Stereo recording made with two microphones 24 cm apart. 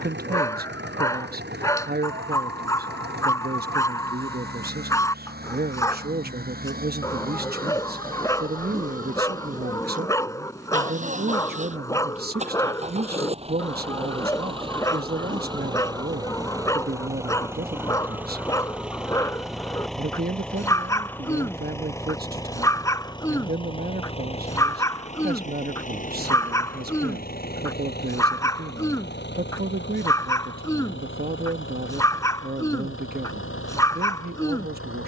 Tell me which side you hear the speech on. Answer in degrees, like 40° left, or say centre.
40° right.